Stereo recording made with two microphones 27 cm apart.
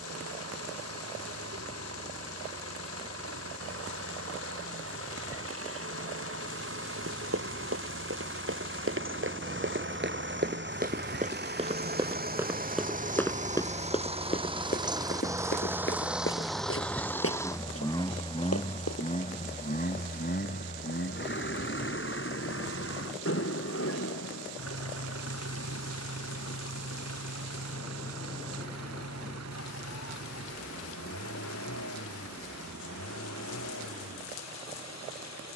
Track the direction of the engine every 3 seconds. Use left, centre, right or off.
right, right, right, right, right, centre, left, left, left, left, left, left.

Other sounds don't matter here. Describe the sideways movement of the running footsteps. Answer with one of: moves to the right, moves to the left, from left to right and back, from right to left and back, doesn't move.
moves to the left.